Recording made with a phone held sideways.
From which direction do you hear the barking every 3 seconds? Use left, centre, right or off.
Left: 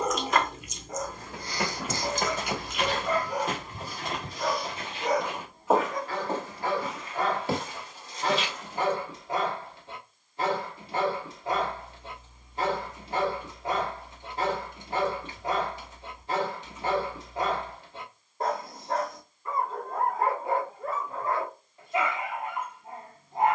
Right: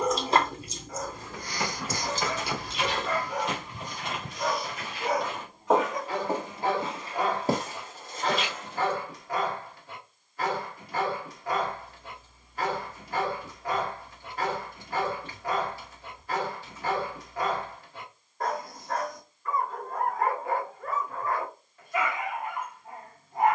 left, centre, centre, left, left, left, left, left.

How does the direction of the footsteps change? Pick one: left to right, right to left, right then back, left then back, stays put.
left to right.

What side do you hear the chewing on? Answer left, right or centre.
right.